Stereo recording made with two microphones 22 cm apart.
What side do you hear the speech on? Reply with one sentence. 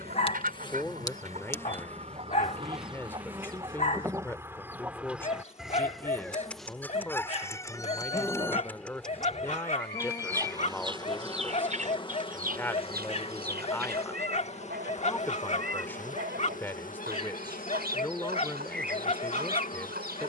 You can hear the speech in the centre.